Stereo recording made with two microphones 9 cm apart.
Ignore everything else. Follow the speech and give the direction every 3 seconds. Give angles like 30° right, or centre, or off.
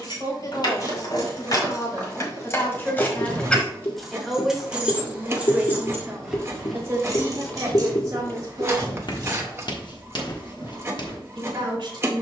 40° left, centre, 40° right, 60° right.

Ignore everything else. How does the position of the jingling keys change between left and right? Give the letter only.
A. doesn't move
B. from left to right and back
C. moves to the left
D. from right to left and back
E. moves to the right
E.